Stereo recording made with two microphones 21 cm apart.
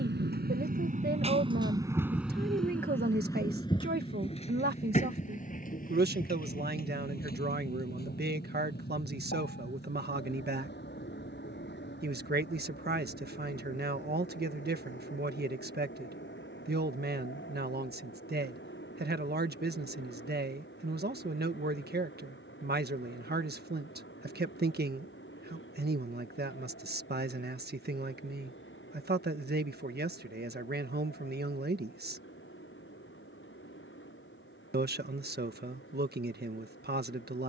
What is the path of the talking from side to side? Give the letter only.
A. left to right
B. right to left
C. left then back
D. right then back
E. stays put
E.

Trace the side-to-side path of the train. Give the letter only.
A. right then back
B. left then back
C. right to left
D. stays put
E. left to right
C.